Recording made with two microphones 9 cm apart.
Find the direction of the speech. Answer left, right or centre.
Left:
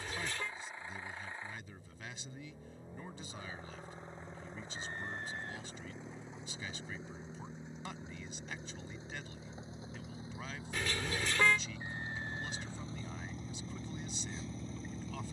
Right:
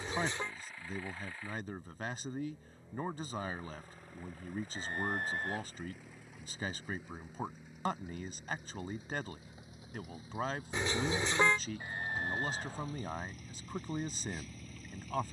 right.